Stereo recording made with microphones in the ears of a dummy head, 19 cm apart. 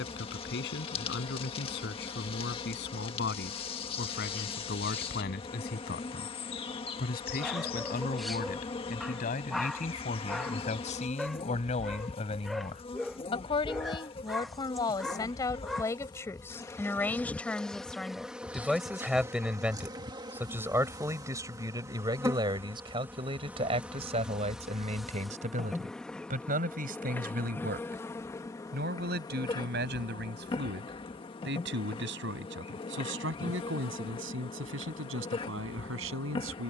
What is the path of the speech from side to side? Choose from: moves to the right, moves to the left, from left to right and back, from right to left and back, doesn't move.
moves to the right.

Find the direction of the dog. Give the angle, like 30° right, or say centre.
centre.